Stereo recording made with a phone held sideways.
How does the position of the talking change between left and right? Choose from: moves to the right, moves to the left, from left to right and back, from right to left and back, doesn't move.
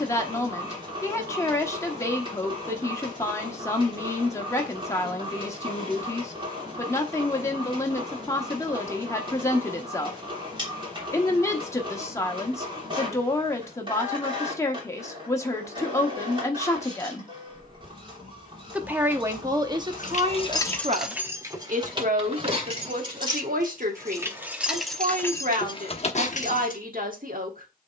moves to the right.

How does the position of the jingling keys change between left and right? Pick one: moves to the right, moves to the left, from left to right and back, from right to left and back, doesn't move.
from left to right and back.